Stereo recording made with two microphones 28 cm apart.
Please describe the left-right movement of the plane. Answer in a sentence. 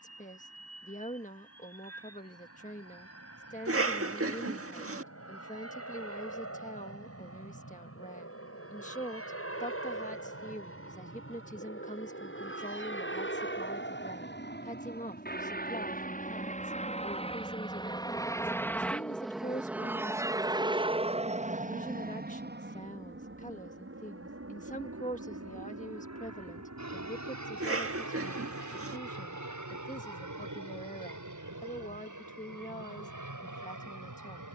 In this clip you hear the plane travel towards the right.